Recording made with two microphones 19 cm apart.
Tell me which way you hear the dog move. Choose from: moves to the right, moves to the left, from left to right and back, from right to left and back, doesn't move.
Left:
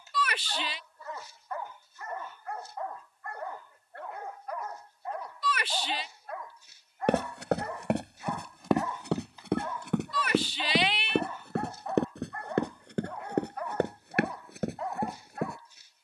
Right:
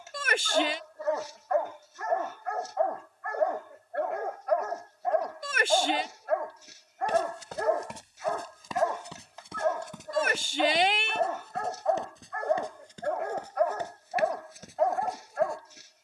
doesn't move.